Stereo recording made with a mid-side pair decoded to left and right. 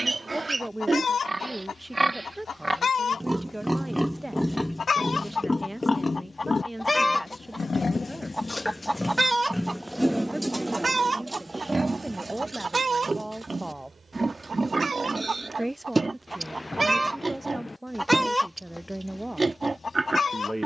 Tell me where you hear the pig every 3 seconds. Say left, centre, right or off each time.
right, centre, left, centre, right, right, right.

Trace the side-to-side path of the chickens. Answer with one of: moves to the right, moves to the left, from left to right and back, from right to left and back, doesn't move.
from left to right and back.